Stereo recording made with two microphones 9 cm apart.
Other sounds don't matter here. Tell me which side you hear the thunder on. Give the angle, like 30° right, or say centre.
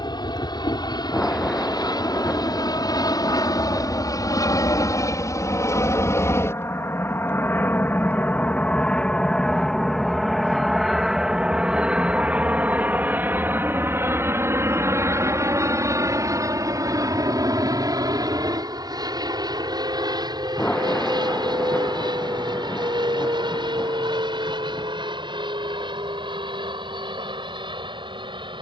10° left.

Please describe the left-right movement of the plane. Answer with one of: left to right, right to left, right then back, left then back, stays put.
left to right.